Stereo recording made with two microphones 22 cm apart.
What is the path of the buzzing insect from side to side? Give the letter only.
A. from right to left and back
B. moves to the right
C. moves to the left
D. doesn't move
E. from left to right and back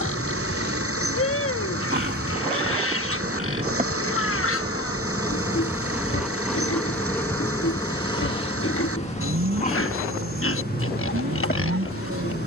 C.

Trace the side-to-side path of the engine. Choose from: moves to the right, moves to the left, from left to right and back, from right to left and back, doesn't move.
doesn't move.